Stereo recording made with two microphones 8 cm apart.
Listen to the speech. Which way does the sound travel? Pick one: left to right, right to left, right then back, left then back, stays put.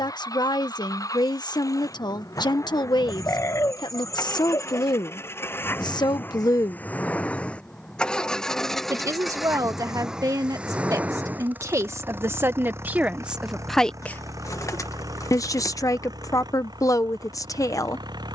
right then back.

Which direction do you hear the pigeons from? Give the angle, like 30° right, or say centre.
40° left.